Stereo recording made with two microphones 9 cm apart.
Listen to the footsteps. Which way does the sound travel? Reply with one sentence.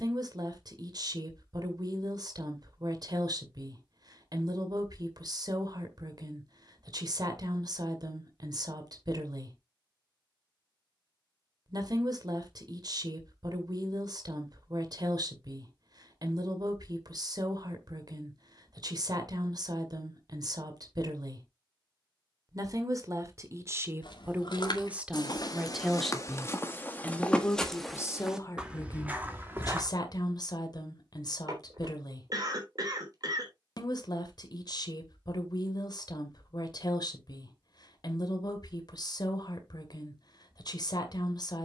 In this clip you hear the footsteps travel towards the right.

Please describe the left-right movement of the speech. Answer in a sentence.
You can hear the speech travel towards the left.